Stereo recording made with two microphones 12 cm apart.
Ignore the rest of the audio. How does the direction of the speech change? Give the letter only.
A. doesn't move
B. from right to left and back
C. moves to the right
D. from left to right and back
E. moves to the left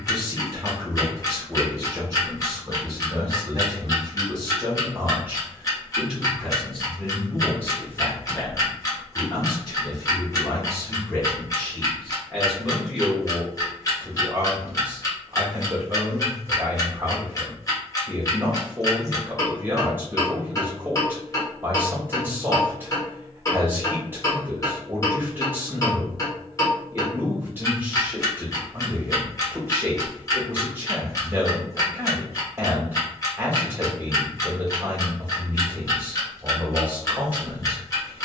B.